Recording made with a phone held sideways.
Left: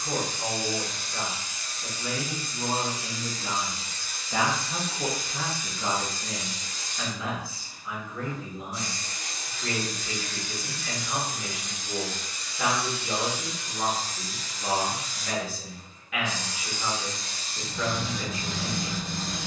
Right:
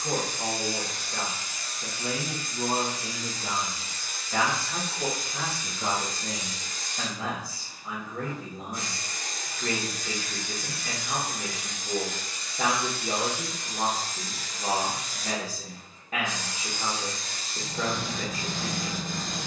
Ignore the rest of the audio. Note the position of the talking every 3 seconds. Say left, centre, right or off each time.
right, centre, right, right, right, right, right.